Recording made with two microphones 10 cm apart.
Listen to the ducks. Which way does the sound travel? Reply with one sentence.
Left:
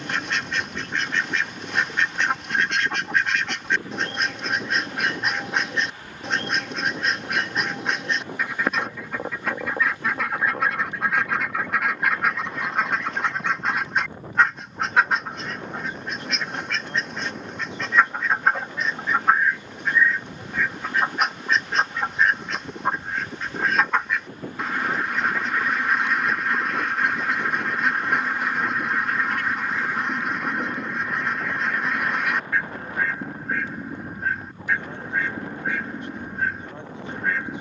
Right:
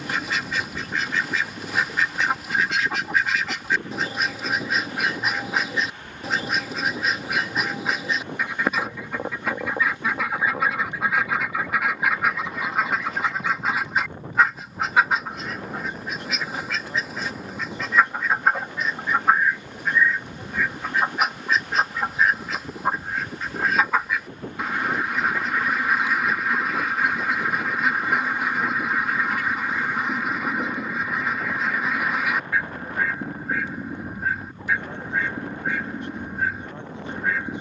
In this clip you hear the ducks stay put.